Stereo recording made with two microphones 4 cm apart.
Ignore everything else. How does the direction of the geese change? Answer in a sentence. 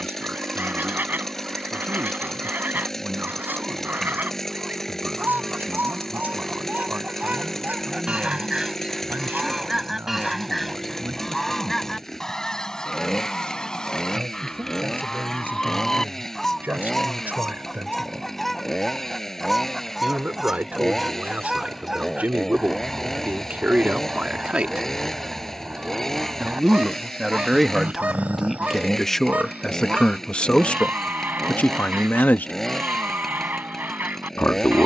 In this clip you hear the geese go left and come back.